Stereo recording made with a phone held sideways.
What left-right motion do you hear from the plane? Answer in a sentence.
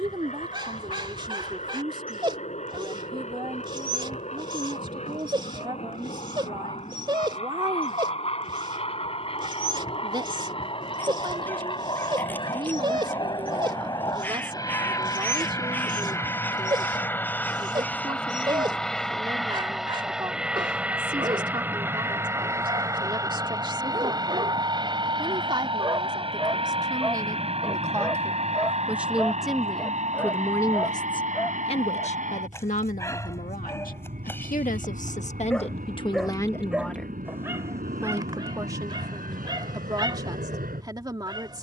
You can hear the plane move to the right.